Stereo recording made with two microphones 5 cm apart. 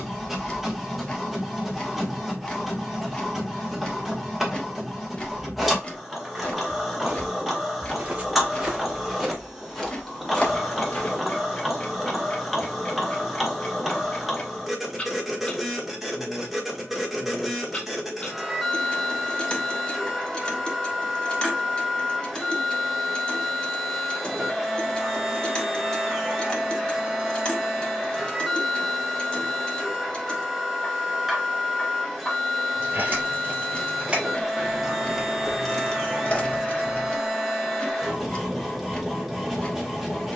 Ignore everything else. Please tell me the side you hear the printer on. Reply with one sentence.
In this clip you hear the printer in the centre.